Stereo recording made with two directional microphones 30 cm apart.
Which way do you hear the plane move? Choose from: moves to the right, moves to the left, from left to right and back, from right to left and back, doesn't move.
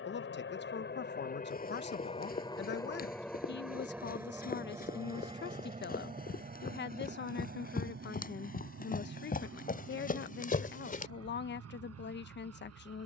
moves to the right.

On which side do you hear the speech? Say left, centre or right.
left.